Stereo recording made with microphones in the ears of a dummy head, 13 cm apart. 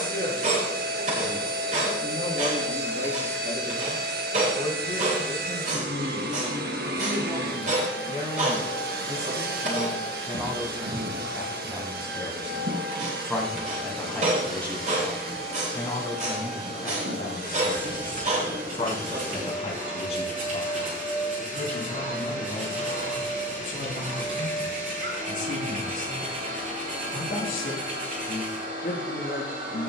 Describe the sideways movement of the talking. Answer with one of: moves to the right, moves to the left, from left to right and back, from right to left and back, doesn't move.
moves to the left.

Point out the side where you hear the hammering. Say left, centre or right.
right.